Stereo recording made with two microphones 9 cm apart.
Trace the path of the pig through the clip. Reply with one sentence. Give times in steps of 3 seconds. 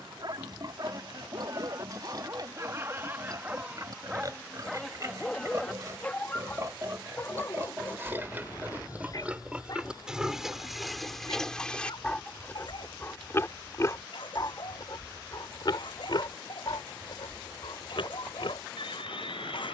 You can hear the pig on the right from 0 s, in the centre from 9 s and on the left from 12 s.